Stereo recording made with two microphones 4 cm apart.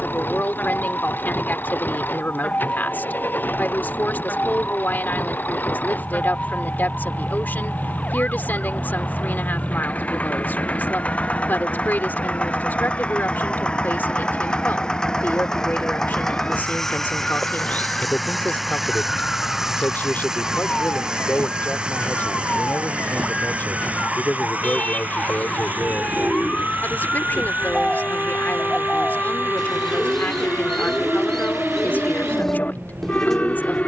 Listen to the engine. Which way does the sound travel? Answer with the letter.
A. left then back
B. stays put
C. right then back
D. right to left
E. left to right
E.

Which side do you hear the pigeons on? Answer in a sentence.
In this clip you hear the pigeons in the centre.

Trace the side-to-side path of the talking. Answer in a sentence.
You can hear the talking stay put.